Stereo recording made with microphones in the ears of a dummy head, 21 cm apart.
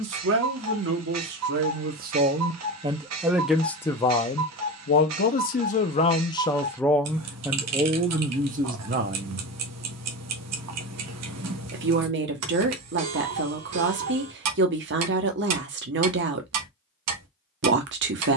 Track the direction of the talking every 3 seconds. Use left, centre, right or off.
right, left, centre, right, right, right.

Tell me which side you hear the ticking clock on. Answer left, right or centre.
right.